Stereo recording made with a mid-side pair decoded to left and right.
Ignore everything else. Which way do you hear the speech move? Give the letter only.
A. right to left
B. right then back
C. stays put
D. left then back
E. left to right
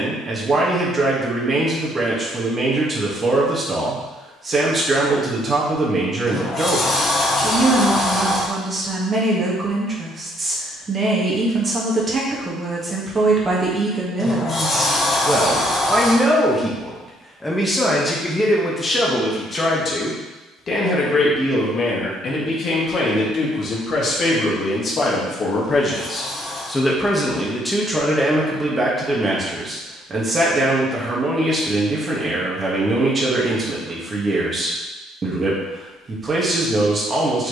D.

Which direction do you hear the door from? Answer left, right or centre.
left.